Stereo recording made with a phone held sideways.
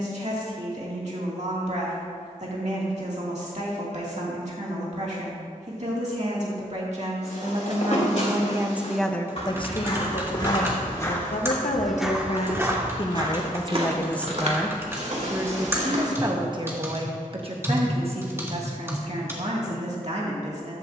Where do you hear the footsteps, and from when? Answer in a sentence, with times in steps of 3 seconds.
In this clip you hear the footsteps not at all from 0 s, on the left from 6 s, on the right from 12 s and not at all from 18 s.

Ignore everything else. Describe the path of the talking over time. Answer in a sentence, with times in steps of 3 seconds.
You can hear the talking on the right from 0 s, on the left from 9 s and on the right from 15 s.